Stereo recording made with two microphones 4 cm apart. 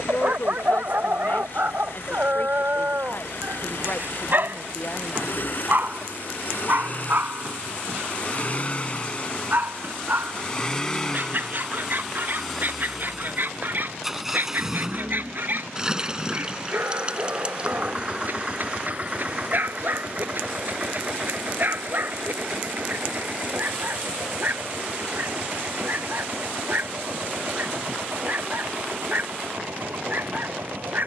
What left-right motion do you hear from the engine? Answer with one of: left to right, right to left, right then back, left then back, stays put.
left to right.